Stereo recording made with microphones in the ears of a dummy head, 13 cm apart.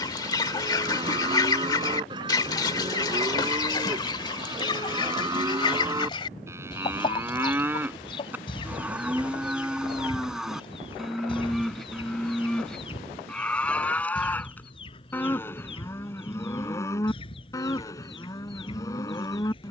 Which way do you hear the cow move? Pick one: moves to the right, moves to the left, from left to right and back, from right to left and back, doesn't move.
moves to the left.